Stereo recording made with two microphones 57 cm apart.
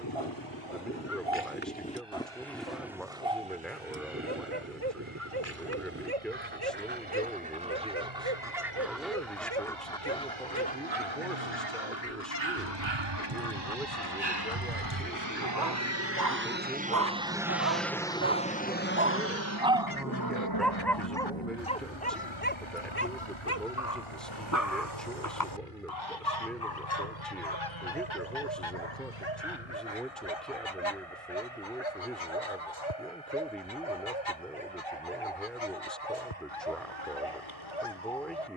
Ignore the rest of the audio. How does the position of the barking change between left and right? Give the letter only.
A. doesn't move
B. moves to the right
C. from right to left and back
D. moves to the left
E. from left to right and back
D.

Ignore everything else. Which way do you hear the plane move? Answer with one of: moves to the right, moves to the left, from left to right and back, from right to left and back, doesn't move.
moves to the left.